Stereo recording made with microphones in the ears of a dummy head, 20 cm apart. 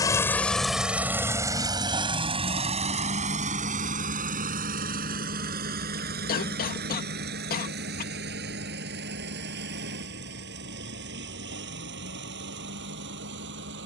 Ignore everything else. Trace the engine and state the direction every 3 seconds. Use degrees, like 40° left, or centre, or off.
10° right, 40° right, 50° right, 50° right, 50° right.